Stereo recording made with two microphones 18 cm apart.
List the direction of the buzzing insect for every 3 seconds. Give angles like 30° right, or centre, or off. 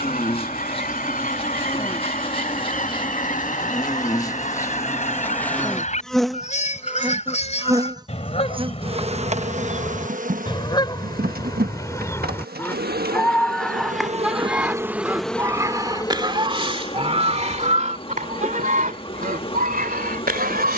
30° left, 20° left, 20° right, 50° right, 50° right, 20° left, 30° left.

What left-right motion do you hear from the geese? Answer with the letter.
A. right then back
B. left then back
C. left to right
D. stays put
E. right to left
C.